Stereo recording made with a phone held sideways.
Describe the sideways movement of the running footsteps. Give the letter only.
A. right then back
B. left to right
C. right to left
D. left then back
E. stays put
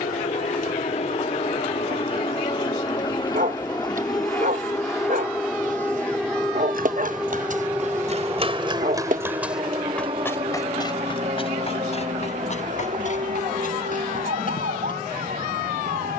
C.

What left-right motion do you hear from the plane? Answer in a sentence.
In this clip you hear the plane travel towards the right.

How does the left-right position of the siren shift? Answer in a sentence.
You can hear the siren move from left to right.